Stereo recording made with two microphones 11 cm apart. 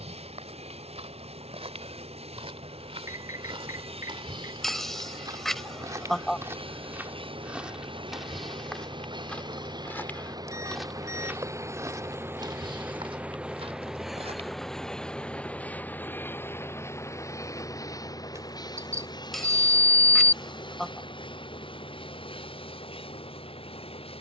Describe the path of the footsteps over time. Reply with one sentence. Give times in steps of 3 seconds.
You can hear the footsteps on the right from 0 s, in the centre from 6 s, on the right from 12 s and not at all from 15 s.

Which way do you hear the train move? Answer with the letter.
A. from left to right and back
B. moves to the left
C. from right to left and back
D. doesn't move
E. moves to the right
B.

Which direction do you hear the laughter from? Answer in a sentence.
In this clip you hear the laughter in the centre.